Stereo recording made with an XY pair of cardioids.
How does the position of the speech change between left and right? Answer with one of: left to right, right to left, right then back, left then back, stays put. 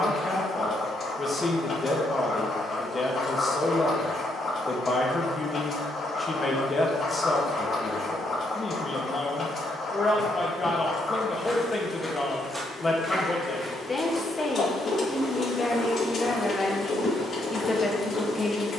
stays put.